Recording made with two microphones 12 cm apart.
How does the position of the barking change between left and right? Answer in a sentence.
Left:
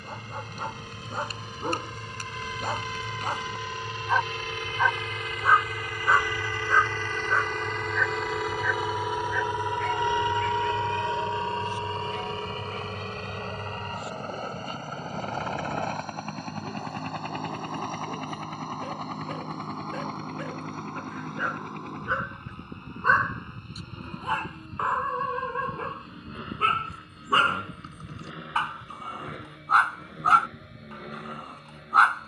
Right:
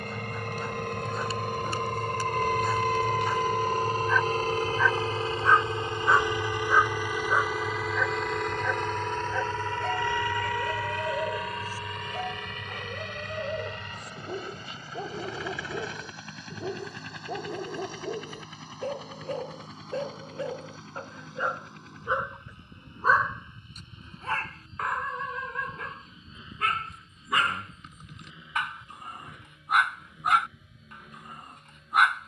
In this clip you hear the barking move from left to right and back again.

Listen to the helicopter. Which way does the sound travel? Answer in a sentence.
You can hear the helicopter go from the right side to the left.